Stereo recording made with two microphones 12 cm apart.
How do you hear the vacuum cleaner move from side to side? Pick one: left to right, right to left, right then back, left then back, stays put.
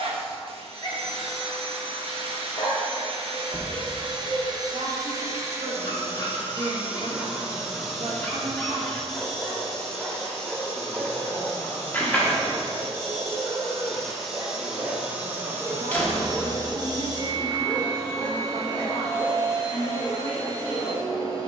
left then back.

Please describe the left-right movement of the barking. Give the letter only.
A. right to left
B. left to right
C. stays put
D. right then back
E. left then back
D.